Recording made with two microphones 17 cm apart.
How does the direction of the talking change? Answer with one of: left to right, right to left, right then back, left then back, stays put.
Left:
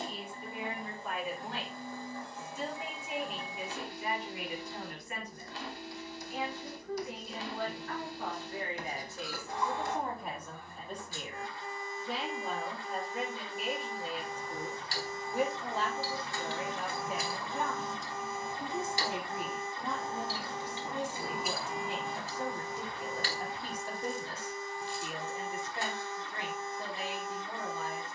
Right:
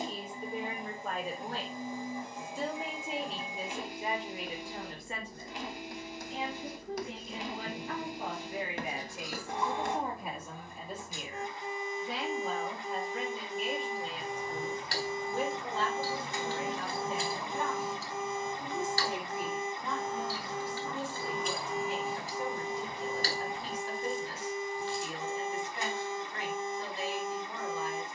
right to left.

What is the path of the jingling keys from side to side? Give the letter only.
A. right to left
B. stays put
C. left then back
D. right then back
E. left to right
C.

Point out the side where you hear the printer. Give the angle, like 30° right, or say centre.
20° right.